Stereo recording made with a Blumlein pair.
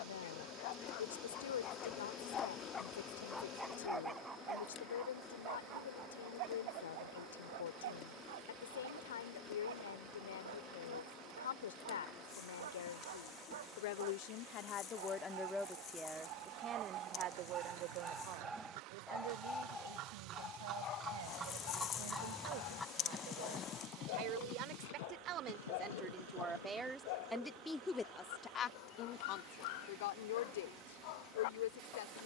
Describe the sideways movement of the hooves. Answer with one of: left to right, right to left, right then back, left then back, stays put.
right to left.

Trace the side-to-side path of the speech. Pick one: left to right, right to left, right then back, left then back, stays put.
right then back.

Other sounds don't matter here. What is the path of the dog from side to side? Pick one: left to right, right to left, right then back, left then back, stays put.
right then back.